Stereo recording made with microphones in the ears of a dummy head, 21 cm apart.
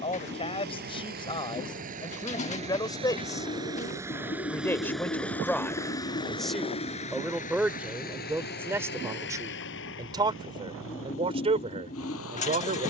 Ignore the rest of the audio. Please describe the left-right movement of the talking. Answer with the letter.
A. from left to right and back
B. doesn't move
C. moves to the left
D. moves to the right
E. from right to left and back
D.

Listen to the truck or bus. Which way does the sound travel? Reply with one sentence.
In this clip you hear the truck or bus move to the left.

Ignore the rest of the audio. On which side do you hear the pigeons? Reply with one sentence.
You can hear the pigeons on the left.